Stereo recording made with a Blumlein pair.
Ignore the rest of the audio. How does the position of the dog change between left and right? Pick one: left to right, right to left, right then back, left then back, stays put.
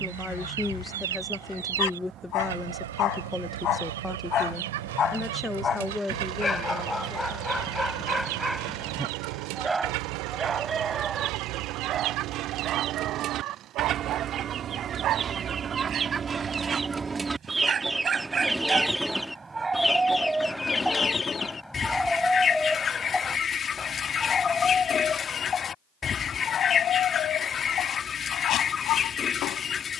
right then back.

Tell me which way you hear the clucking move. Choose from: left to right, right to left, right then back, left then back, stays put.
right to left.